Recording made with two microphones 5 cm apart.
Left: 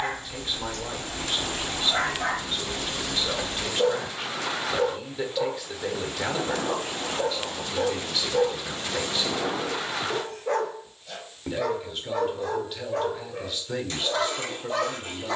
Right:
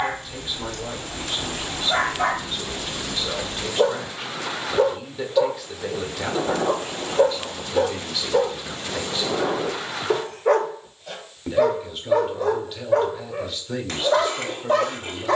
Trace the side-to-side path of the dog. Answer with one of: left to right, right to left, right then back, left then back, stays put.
stays put.